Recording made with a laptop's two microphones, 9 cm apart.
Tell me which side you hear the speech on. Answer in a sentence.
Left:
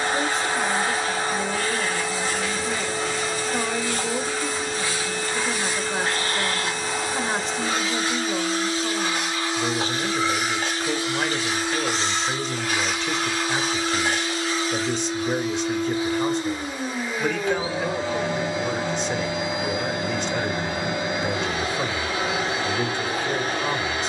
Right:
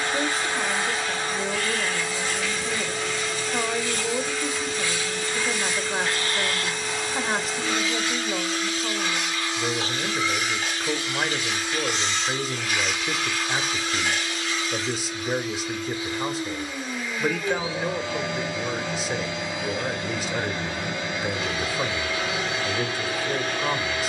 In this clip you hear the speech in the centre.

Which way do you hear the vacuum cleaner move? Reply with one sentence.
In this clip you hear the vacuum cleaner stay put.